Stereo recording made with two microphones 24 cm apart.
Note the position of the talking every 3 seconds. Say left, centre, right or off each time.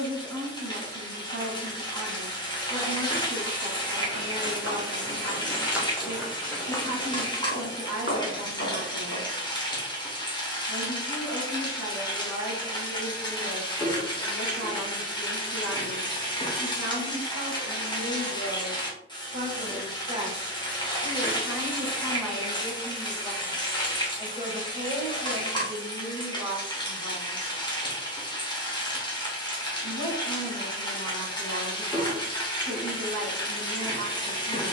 right, right, right, right, right, right, right, centre, right, right, right, right.